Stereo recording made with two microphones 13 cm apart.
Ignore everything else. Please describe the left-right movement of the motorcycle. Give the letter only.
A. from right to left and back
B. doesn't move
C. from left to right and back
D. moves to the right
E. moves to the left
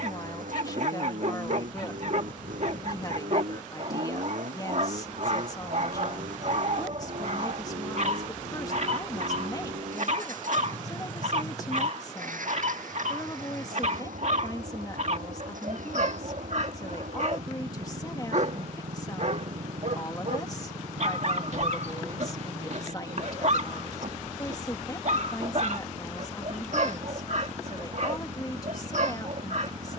B.